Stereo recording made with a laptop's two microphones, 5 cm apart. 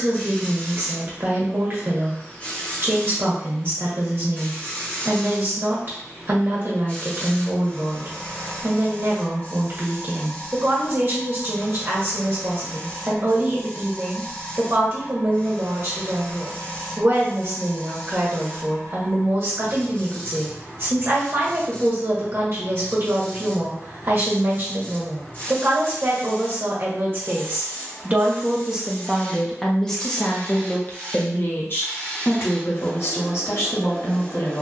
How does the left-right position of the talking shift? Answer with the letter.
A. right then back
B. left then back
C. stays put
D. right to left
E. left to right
D.